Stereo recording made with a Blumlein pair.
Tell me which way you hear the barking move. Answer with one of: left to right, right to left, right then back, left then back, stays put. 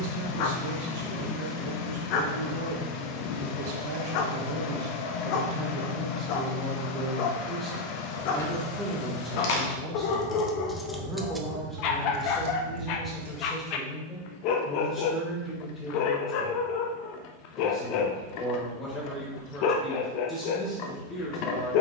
stays put.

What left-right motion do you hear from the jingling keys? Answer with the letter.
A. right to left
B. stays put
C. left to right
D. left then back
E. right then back
C.